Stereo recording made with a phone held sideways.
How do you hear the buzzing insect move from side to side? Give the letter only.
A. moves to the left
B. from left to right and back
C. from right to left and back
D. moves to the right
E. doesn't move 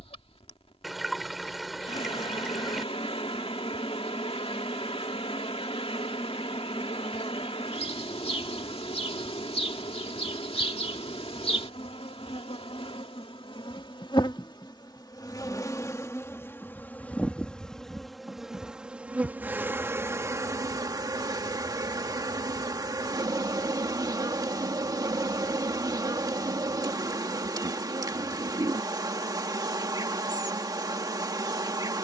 D.